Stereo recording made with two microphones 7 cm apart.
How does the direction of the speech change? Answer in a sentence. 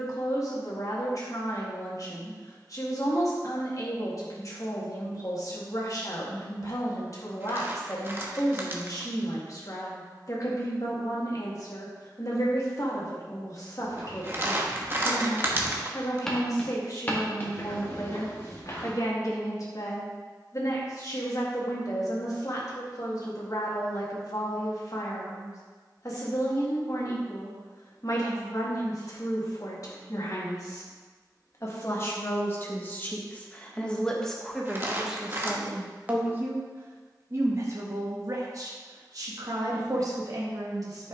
You can hear the speech go from the left side to the right.